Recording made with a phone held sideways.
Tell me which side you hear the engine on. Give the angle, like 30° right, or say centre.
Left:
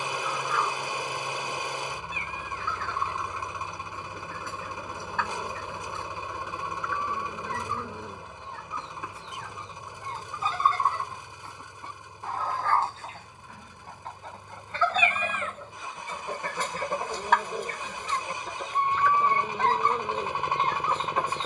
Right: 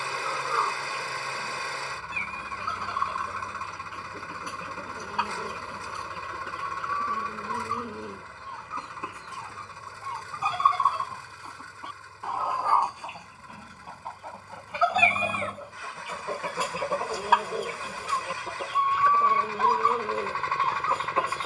20° left.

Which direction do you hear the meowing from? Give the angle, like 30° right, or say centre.
30° right.